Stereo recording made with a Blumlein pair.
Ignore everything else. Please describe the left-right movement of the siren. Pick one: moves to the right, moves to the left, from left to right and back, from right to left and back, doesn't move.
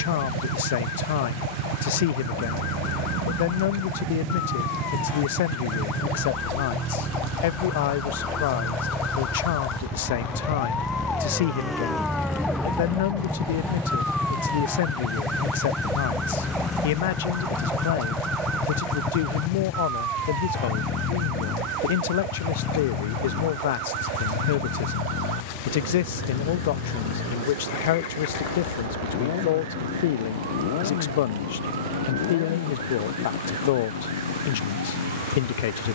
moves to the right.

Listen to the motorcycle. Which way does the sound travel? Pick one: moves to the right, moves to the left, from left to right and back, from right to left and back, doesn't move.
moves to the left.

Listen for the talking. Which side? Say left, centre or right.
left.